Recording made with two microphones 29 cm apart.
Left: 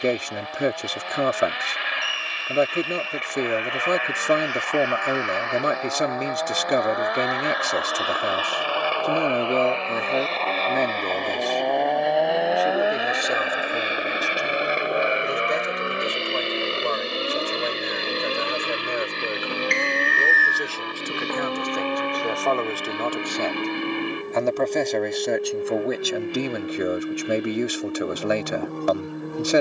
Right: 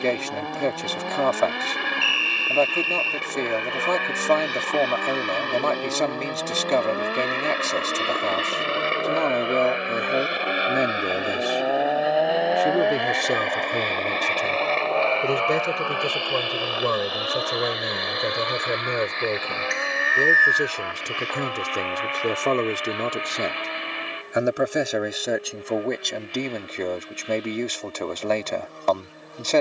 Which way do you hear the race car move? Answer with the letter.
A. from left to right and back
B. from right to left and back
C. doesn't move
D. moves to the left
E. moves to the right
D.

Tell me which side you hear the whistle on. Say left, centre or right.
centre.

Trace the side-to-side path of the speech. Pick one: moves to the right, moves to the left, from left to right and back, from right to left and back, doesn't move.
from left to right and back.